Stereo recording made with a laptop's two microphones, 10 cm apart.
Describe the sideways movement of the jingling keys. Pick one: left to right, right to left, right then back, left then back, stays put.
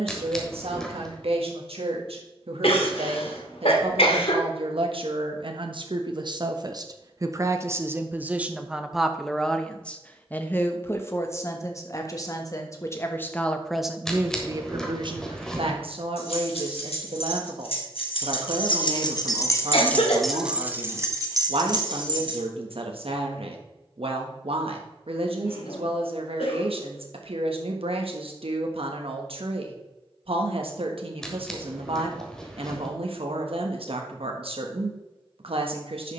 left to right.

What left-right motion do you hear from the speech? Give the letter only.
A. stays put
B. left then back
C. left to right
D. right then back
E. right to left
B.